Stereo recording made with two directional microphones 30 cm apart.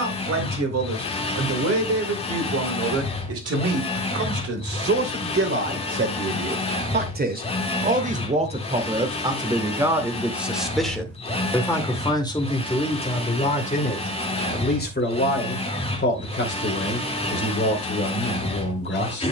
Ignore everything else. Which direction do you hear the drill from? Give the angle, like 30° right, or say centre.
20° left.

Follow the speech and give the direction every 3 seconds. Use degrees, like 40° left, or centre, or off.
60° right, 50° right, 30° right, centre, 20° left, 40° left, 40° left.